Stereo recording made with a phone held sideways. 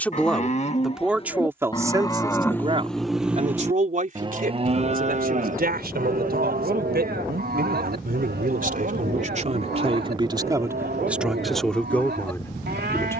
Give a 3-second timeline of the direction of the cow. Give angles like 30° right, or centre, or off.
30° left, 30° right, 70° right, 80° right, 80° right.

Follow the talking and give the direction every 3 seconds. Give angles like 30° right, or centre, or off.
10° right, 60° right, 70° right, 20° right, 10° left.